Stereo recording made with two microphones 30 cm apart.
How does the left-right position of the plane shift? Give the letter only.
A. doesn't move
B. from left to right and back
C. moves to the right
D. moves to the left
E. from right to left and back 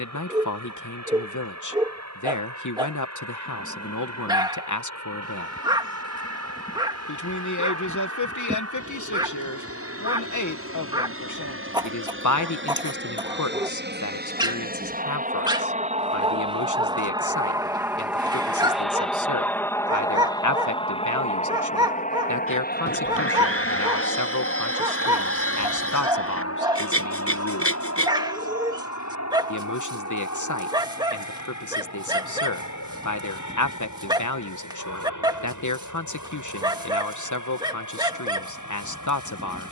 D.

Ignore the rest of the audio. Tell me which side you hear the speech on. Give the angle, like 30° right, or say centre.
80° left.